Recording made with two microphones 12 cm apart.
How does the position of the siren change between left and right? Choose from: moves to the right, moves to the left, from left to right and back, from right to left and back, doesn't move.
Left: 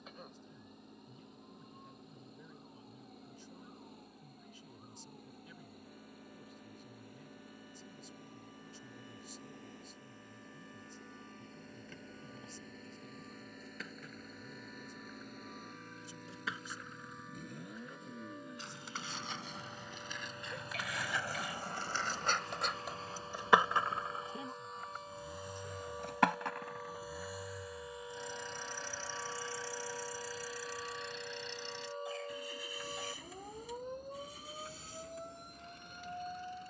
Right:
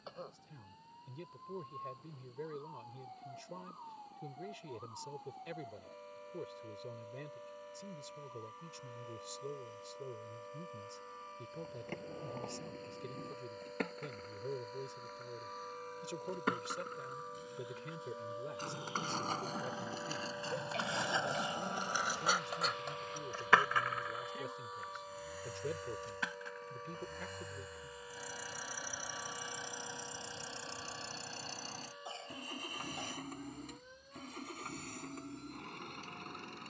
moves to the left.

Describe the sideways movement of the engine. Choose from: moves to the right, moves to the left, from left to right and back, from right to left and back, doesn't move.
moves to the right.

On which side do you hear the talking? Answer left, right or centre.
right.